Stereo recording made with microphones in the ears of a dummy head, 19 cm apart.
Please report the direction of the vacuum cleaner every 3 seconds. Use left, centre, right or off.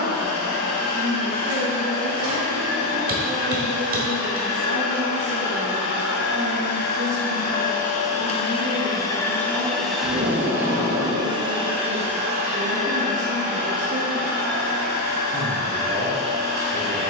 left, left, left, centre, right, right.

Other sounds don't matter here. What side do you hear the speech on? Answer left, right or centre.
right.